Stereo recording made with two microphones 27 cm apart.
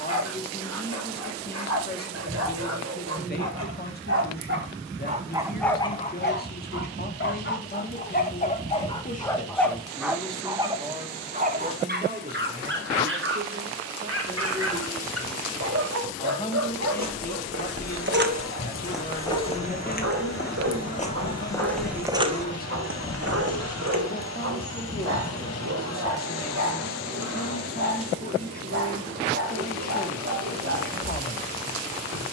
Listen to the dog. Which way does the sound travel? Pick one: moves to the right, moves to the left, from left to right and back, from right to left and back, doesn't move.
from right to left and back.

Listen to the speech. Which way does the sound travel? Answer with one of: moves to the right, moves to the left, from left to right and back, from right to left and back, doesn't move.
from left to right and back.